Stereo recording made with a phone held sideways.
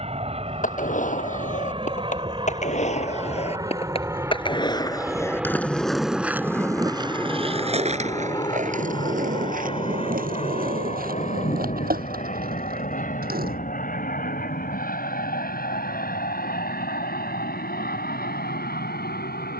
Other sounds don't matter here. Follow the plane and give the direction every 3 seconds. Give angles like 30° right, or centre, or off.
40° right, 20° right, 20° left, 40° left, 60° left, 70° left, 70° left.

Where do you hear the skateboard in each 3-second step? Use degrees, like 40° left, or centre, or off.
60° left, 30° left, 40° right, 70° right, 80° right, off, off.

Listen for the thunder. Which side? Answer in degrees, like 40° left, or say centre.
60° left.